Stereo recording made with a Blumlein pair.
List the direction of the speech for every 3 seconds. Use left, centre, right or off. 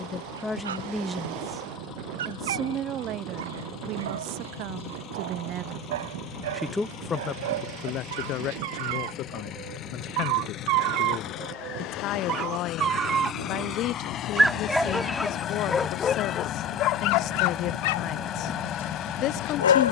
centre, right, left, left, left, left, left.